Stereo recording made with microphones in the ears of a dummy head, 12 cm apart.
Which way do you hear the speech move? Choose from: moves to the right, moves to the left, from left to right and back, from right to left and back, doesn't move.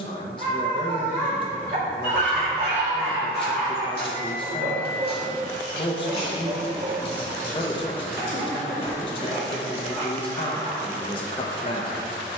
doesn't move.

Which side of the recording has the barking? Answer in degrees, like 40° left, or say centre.
70° right.